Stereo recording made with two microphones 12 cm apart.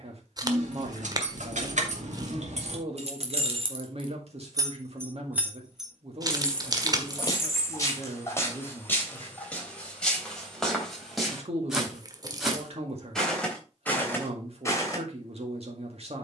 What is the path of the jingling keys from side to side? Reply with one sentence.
In this clip you hear the jingling keys move from right to left.